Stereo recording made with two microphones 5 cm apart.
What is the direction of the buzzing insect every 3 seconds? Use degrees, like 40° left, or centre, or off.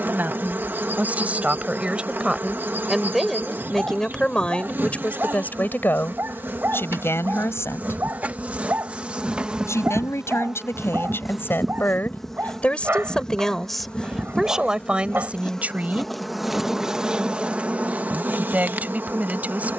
40° right, 40° right, 40° right, 10° right, 10° left, 10° right, 40° right.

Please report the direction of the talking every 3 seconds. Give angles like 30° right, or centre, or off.
20° right, 20° left, 50° left, 50° left, 10° left, 30° right, 30° right.